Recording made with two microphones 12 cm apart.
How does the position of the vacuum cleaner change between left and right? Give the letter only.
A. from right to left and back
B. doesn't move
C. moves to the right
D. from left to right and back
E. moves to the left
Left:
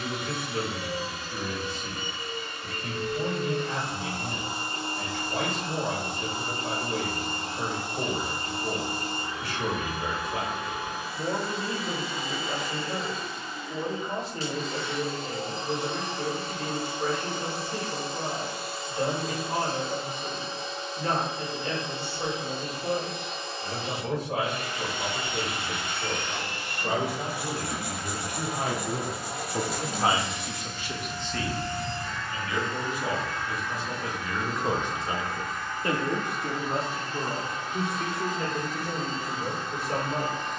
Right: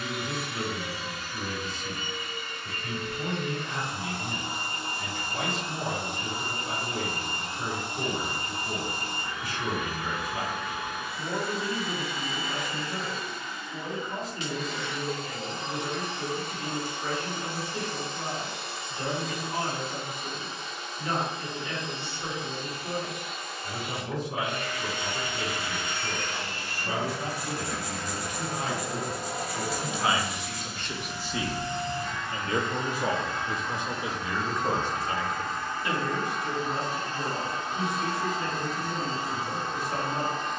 C.